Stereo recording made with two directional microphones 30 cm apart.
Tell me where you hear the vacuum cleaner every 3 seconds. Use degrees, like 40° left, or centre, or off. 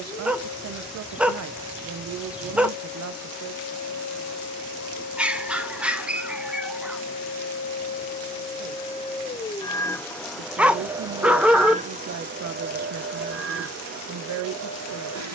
70° left, 60° left, 40° left, centre, 40° right.